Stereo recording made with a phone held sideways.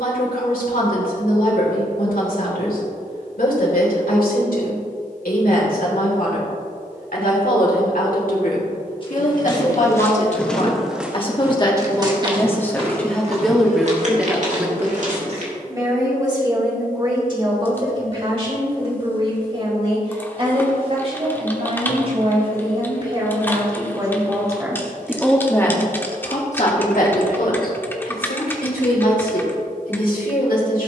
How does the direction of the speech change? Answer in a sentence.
You can hear the speech go right and come back.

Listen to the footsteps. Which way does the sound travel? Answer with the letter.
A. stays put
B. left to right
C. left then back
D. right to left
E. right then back
B.